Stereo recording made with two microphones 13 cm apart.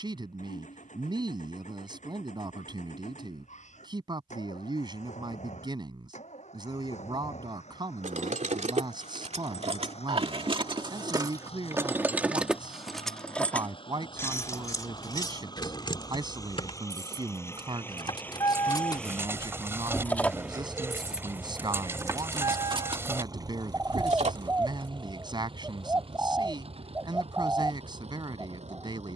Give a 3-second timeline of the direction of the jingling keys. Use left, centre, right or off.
off, off, right, right, centre, left, left, right, right, off.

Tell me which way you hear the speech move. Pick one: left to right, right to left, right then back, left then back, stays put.
stays put.